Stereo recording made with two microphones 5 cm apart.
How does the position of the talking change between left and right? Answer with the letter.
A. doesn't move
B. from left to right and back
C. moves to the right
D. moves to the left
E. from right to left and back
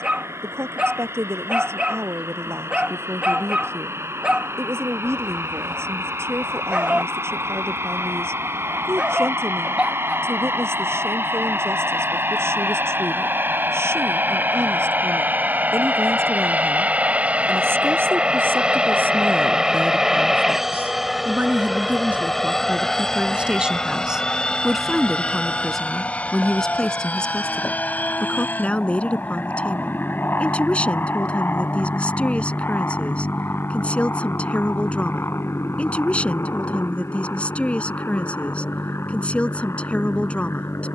D.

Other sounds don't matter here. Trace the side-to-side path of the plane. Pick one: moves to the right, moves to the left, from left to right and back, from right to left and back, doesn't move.
moves to the left.